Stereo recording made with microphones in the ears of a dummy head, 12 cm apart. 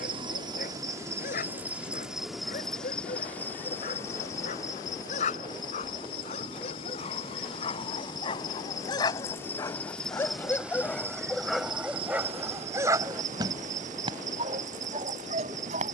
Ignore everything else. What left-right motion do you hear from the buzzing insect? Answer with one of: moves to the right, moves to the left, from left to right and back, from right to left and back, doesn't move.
from right to left and back.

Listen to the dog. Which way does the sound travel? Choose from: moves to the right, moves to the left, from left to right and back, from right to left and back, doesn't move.
moves to the right.